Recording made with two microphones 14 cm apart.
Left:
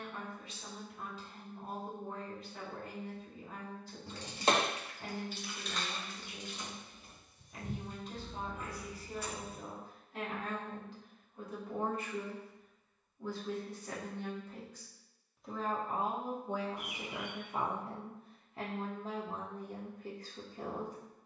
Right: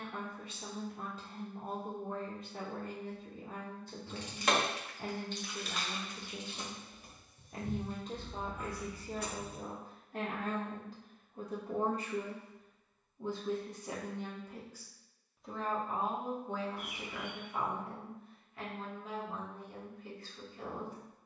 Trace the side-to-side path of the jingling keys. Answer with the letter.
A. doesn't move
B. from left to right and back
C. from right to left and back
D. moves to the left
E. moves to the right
E.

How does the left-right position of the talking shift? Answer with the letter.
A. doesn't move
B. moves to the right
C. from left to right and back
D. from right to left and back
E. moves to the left
E.